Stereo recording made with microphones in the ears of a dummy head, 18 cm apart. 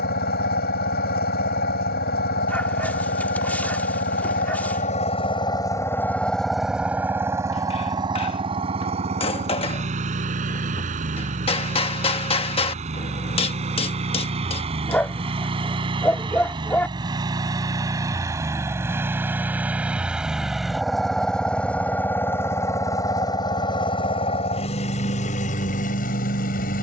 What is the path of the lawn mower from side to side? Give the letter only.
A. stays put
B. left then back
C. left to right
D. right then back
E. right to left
D.